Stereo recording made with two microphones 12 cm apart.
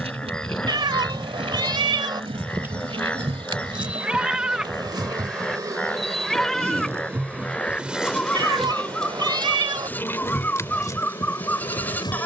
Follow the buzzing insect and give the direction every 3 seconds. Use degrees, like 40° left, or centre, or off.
60° right, 40° right, 10° right, 20° left.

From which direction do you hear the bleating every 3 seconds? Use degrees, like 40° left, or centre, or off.
10° right, 10° right, 10° left, 10° left.